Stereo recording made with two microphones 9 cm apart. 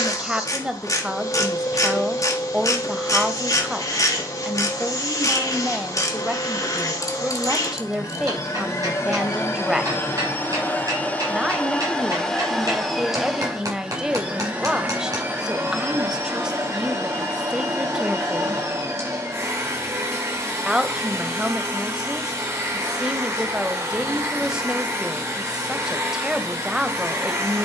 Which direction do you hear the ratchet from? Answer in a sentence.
You can hear the ratchet on the left.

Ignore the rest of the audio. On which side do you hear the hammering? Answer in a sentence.
In this clip you hear the hammering on the right.